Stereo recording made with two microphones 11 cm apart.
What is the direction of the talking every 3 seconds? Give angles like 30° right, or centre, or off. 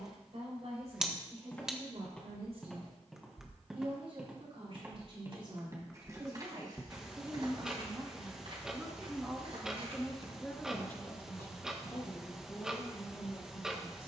60° right, 50° right, 30° right, 10° left, 40° left.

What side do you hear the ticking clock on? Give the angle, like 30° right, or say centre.
10° right.